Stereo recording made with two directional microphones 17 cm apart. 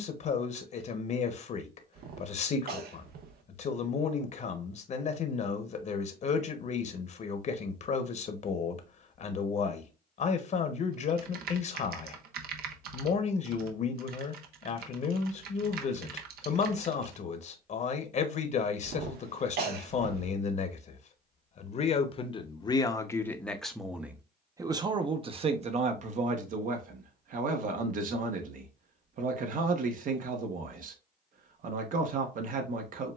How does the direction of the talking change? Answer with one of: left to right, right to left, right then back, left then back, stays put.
left to right.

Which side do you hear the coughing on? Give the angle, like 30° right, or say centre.
70° right.